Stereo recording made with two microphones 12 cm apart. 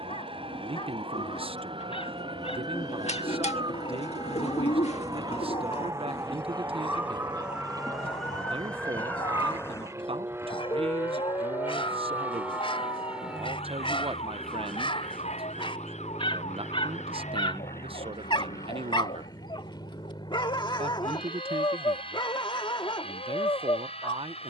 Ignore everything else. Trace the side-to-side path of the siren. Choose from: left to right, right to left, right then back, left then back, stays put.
right to left.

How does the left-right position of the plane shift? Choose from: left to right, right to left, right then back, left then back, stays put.
right to left.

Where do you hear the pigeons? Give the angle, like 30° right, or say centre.
60° left.